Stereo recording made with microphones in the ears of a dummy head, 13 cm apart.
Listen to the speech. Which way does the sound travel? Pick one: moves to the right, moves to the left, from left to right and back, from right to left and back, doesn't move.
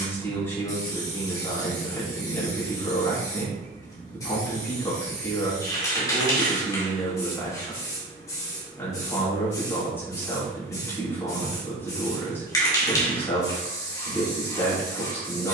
doesn't move.